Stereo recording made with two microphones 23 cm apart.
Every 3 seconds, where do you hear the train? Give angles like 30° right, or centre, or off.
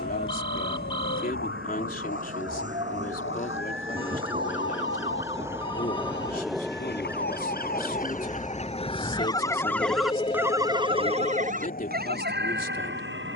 40° right, 20° right, 10° left, 30° left, 50° left.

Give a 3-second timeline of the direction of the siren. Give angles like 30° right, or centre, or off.
70° left, 60° left, 40° left, 10° right, 50° right.